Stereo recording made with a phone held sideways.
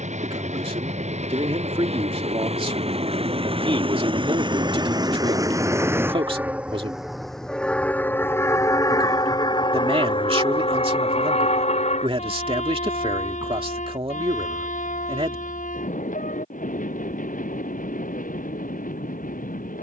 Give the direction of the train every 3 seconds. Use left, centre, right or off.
right, right, centre, left, left, left, left.